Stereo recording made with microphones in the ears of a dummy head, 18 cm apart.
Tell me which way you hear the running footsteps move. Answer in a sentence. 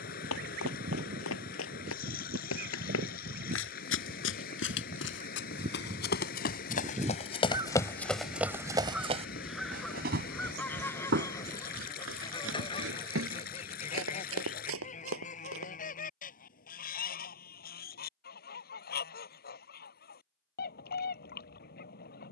You can hear the running footsteps go from the left side to the right.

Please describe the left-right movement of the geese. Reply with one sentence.
You can hear the geese travel towards the left.